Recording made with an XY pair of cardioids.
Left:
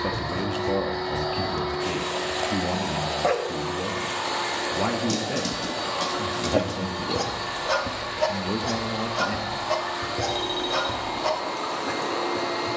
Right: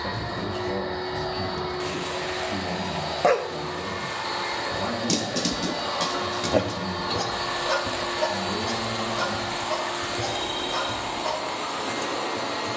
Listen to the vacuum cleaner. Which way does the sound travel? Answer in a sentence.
In this clip you hear the vacuum cleaner go right and come back.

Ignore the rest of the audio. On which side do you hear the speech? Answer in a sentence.
You can hear the speech on the left.